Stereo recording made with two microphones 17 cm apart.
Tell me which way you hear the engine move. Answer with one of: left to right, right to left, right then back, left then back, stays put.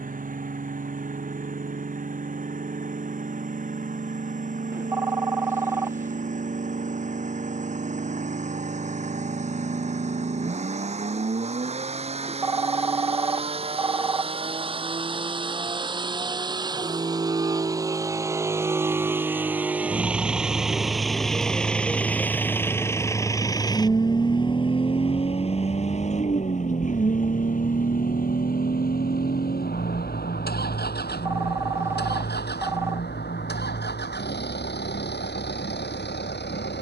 right to left.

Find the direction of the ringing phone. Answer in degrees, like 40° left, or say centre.
10° right.